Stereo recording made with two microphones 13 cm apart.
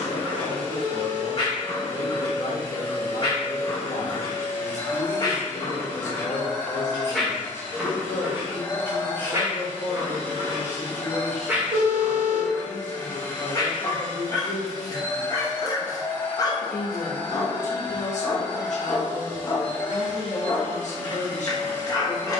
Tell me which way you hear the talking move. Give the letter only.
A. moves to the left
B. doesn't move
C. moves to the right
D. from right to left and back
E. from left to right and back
B.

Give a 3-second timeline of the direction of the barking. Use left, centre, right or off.
left, left, centre, right, left, left, left, left.